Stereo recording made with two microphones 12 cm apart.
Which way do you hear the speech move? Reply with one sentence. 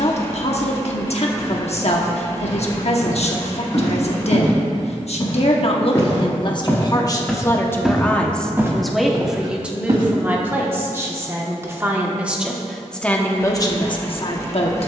In this clip you hear the speech go right and come back.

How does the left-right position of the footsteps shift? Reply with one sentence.
In this clip you hear the footsteps move from left to right.